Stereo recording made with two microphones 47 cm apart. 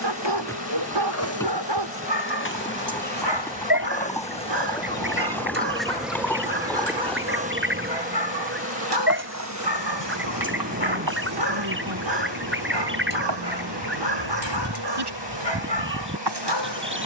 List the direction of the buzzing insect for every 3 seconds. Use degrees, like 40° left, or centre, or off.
30° left, 10° left, 20° right, 40° right, 60° right, 60° right.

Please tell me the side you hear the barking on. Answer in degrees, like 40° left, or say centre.
60° right.